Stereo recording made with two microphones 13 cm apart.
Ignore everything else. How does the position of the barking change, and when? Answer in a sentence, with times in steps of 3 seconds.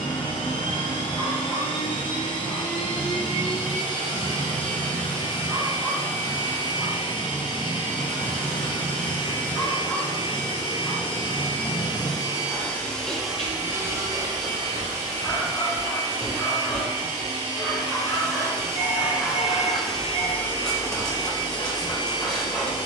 You can hear the barking on the right from 0 s and in the centre from 6 s.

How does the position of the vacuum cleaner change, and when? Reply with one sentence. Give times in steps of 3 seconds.
You can hear the vacuum cleaner on the left from 0 s, in the centre from 12 s, on the right from 15 s, in the centre from 18 s and on the left from 21 s.